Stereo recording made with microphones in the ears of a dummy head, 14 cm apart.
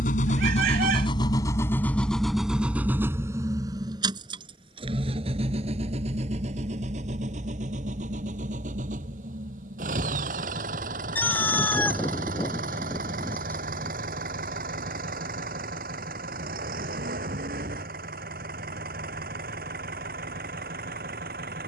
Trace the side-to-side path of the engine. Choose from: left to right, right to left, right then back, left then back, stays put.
left to right.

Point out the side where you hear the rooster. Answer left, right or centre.
centre.